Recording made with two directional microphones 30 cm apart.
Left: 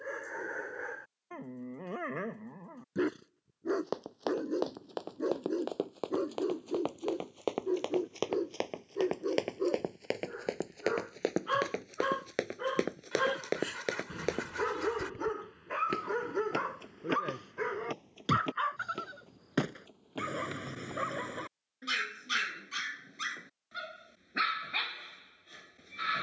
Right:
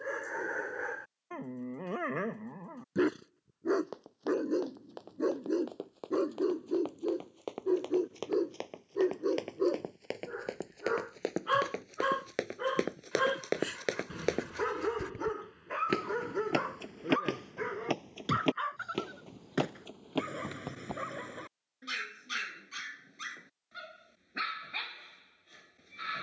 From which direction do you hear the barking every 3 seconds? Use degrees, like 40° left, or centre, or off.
20° right, 20° right, 20° right, 20° right, centre, 10° left, 20° left, 30° left, 30° left.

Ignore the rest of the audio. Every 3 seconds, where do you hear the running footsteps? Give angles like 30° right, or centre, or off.
off, 60° left, 50° left, 30° left, centre, 40° right, 60° right, off, off.